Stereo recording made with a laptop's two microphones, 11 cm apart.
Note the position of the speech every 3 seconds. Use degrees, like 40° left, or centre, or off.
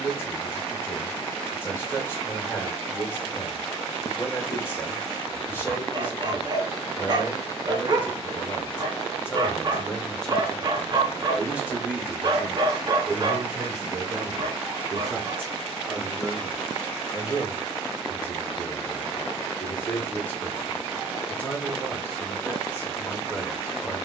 20° left, 20° left, 20° left, centre, 30° right, 10° right, 10° left, 10° left.